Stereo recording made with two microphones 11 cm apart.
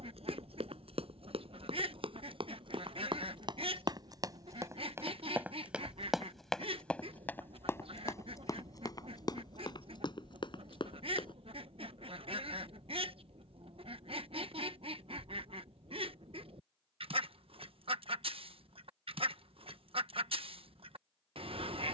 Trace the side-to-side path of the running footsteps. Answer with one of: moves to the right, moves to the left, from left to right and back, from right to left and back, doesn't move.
moves to the left.